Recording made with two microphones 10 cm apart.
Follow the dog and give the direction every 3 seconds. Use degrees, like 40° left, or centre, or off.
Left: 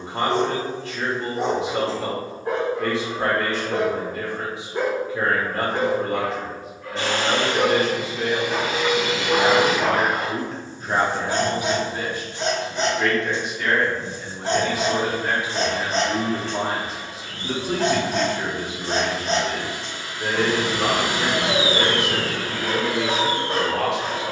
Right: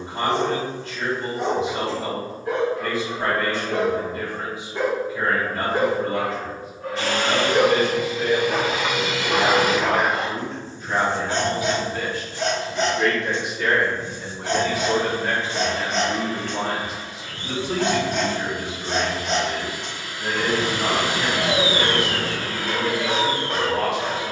40° left, 20° left, 20° right, 10° left, 30° left, 30° left, 30° left, 30° left.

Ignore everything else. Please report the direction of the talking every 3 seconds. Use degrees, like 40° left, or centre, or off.
70° left, 70° left, 70° left, 40° left, centre, 30° left, 60° left, 70° left.